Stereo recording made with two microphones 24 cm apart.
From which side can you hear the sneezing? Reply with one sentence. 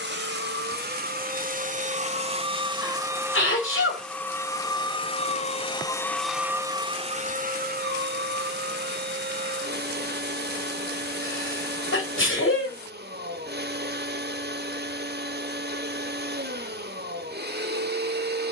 You can hear the sneezing on the left.